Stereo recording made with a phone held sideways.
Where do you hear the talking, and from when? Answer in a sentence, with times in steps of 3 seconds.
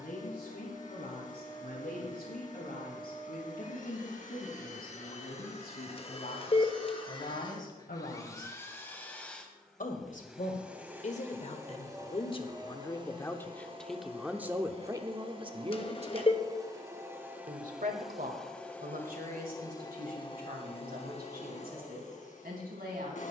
In this clip you hear the talking on the left from 0 s, in the centre from 12 s and on the right from 15 s.